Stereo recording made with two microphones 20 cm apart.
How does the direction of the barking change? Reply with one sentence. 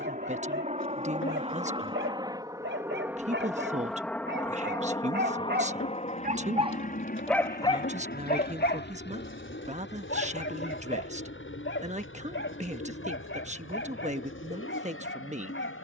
In this clip you hear the barking move to the left.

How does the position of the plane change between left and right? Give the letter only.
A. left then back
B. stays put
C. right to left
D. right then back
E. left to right
C.